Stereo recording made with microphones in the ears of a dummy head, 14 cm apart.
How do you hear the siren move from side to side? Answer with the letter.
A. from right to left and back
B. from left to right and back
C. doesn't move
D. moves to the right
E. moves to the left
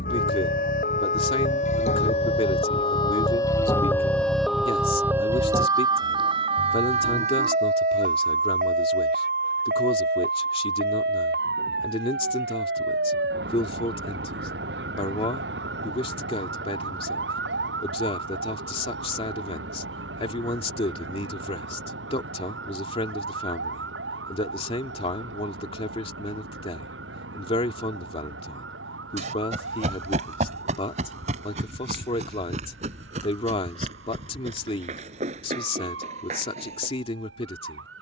D.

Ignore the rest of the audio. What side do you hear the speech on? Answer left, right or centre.
left.